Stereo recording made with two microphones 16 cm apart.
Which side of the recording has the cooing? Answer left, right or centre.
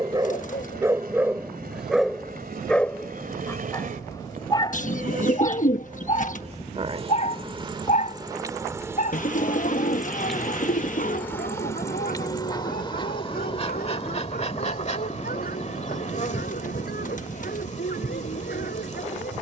left.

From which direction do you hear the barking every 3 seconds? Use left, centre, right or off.
centre, left, left, left, left, left, left.